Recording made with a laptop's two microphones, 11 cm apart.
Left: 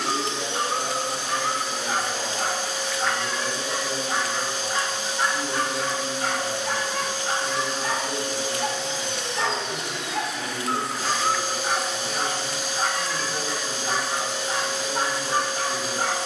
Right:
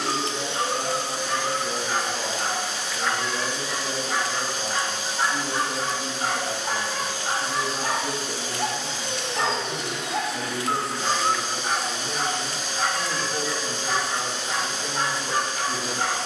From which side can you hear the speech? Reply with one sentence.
You can hear the speech on the right.